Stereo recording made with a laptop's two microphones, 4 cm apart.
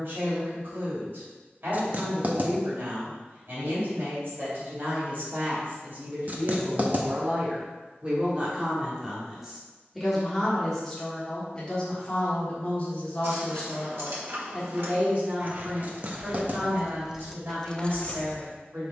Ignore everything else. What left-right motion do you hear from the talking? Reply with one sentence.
You can hear the talking move from right to left and back again.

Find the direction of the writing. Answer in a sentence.
In this clip you hear the writing on the right.